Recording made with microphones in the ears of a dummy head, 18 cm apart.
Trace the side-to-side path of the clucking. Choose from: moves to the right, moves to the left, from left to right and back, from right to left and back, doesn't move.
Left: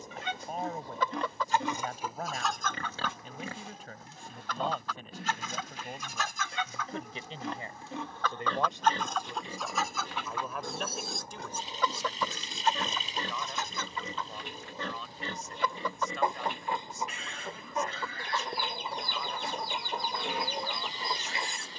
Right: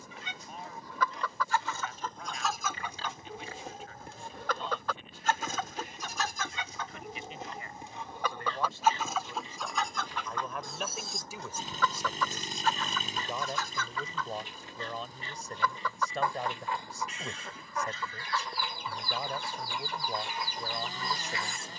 from left to right and back.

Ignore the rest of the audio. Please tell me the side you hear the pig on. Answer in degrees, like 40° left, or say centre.
50° left.